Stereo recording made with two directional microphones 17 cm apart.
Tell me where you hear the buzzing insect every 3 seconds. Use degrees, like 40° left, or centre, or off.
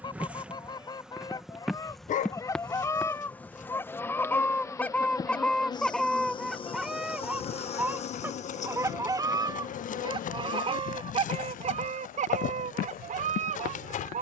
centre, 20° left, 40° left, 50° left, 60° left.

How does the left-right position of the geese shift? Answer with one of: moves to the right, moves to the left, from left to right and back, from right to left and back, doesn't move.
moves to the right.